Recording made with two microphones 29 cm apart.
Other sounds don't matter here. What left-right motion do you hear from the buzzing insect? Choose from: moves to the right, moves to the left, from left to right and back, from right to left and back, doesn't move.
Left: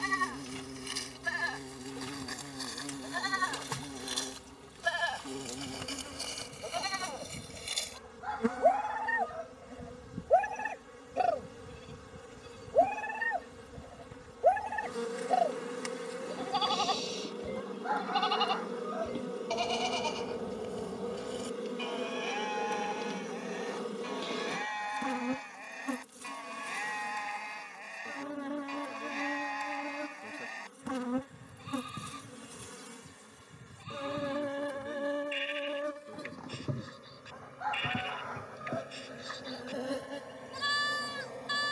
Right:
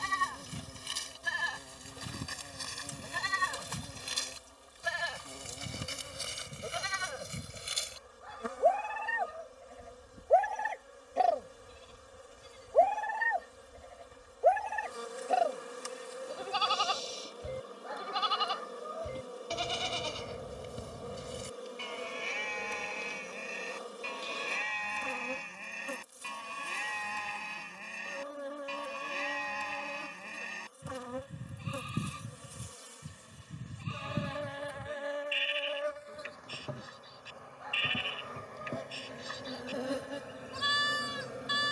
moves to the right.